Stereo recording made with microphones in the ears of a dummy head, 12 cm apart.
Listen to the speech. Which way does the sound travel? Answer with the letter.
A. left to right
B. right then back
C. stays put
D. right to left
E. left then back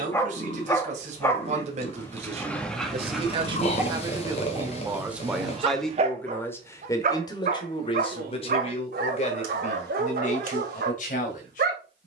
D.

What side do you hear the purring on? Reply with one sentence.
You can hear the purring on the left.